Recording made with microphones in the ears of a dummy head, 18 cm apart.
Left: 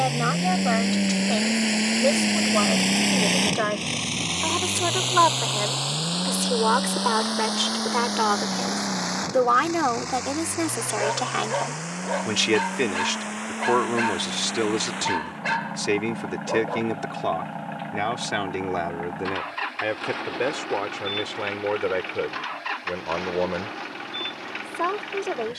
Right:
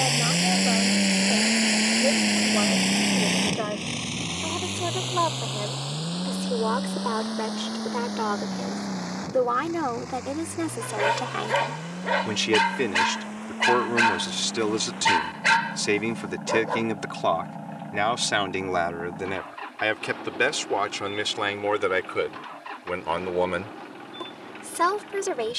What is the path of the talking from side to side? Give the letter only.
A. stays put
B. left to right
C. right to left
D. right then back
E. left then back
B.